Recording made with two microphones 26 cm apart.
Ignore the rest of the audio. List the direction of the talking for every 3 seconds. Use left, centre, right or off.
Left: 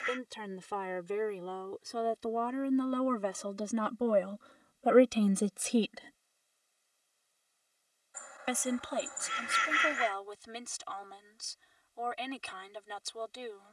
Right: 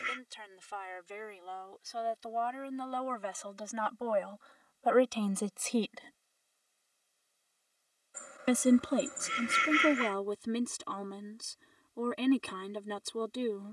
left, left, right, right, right.